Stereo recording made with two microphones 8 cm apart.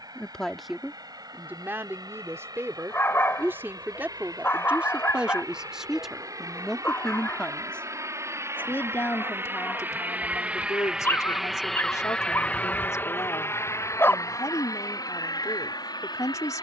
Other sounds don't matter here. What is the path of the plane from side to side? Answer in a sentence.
You can hear the plane go from the right side to the left.